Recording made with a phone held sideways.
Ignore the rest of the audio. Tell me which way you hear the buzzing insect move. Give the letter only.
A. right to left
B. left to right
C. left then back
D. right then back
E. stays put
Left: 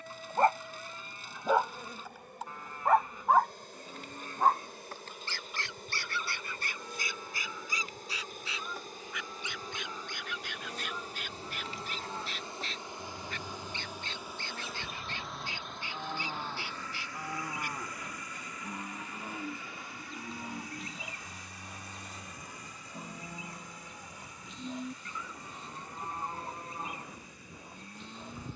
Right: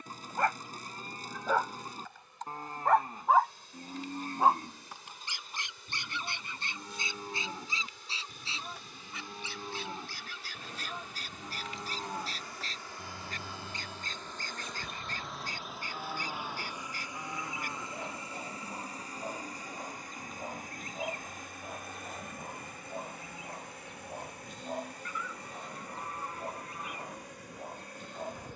B.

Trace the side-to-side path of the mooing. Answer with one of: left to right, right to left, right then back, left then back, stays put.
right to left.